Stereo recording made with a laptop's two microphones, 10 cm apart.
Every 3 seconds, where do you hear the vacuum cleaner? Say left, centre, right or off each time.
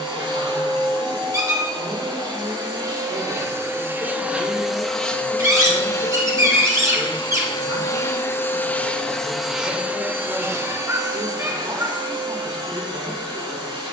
right, centre, left, right, right.